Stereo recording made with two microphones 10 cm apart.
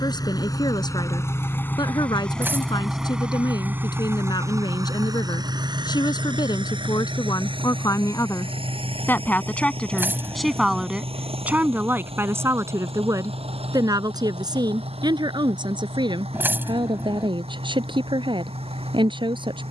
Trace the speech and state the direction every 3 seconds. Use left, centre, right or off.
left, left, left, centre, right, right, right.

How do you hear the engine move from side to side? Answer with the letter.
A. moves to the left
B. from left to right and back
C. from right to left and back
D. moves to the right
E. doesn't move
D.